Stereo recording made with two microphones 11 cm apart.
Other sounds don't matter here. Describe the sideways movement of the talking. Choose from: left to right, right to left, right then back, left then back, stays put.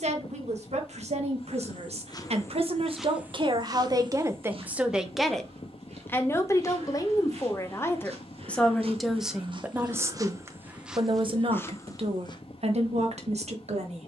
left then back.